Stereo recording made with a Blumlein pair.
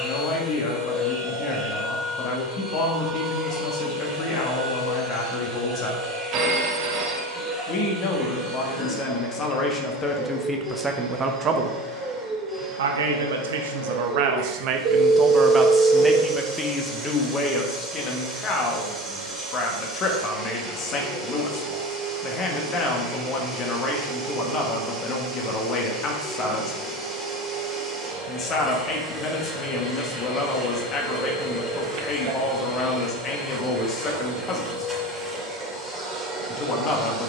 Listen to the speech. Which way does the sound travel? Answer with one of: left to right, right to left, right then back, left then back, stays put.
right then back.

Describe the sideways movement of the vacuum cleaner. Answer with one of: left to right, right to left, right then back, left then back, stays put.
stays put.